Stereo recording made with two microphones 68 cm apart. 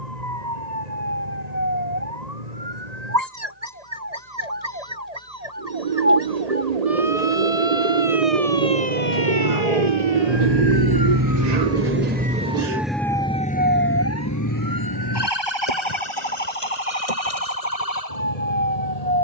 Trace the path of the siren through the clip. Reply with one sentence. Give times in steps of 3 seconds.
You can hear the siren on the right from 0 s, in the centre from 12 s and on the left from 15 s.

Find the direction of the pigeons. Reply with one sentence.
You can hear the pigeons on the right.